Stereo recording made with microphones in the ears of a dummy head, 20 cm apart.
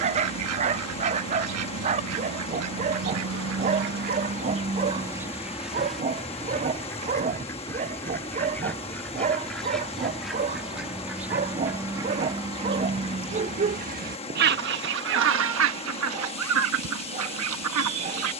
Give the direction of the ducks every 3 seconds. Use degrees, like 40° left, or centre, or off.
80° right, 30° right, 10° left, centre, 30° right, 70° right.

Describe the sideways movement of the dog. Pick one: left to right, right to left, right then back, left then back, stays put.
stays put.